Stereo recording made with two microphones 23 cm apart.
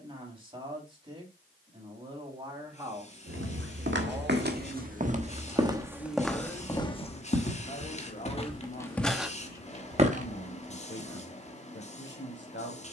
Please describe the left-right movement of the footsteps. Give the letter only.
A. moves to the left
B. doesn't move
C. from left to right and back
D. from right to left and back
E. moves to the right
D.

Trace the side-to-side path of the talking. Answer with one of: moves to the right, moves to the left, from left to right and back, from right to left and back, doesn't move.
moves to the left.